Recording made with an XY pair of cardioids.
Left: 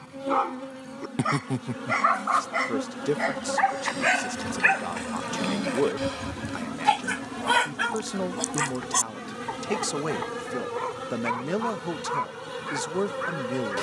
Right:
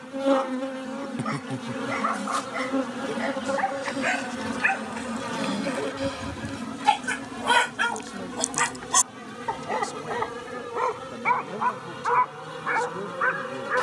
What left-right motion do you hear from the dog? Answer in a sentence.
You can hear the dog move from left to right.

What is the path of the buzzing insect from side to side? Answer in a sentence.
You can hear the buzzing insect move to the left.